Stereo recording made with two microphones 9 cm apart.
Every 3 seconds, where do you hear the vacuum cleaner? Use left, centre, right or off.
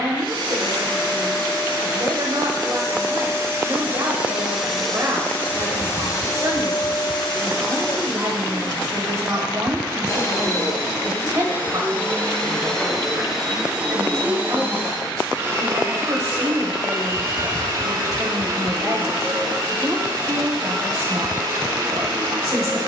right, centre, left, left, centre, right, right, right.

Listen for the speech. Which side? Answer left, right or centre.
right.